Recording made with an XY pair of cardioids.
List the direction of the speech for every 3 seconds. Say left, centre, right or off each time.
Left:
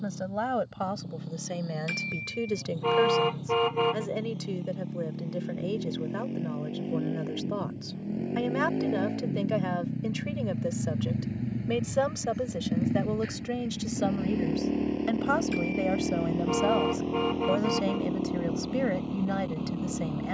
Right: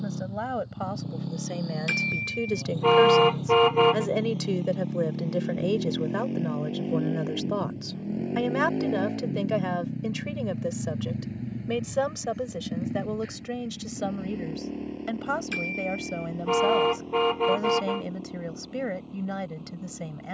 centre, right, right, centre, centre, centre, centre.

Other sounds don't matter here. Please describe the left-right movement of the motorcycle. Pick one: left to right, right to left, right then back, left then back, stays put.
right to left.